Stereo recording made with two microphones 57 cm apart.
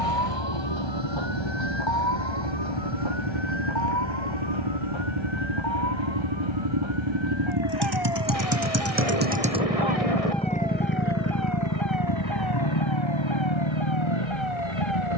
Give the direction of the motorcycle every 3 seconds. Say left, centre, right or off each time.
right, right, right, centre, left.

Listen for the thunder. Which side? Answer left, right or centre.
left.